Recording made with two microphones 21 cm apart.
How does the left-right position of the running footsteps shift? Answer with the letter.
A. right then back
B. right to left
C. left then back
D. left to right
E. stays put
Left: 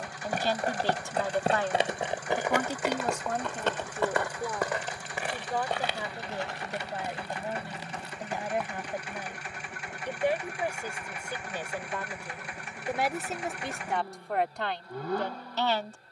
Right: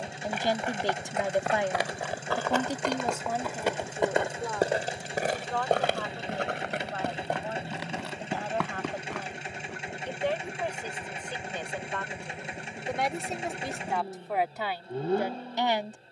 D.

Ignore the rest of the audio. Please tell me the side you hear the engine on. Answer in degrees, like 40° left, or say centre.
20° right.